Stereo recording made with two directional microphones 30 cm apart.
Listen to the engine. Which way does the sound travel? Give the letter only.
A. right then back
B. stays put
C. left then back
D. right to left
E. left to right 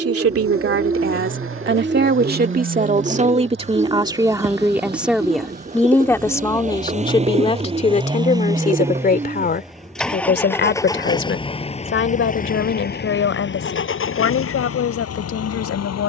D.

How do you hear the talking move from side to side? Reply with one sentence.
You can hear the talking move to the left.